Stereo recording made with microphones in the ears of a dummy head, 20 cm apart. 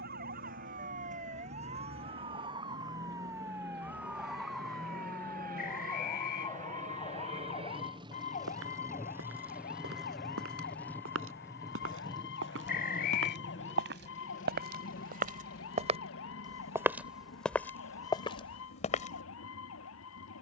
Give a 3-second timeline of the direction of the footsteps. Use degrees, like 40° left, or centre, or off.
off, off, 80° right, 70° right, 60° right, 20° right, 30° left.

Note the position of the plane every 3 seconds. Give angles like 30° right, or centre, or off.
60° right, 50° right, 30° right, centre, 30° left, 50° left, 50° left.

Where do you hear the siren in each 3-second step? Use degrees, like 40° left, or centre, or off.
30° right, centre, 30° left, 40° left, 50° left, 60° left, 60° left.